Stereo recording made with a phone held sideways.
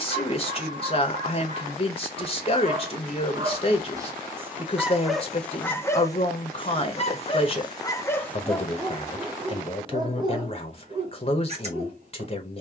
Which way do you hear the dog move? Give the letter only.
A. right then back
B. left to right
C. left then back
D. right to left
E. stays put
C.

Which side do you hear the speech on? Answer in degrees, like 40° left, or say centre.
40° left.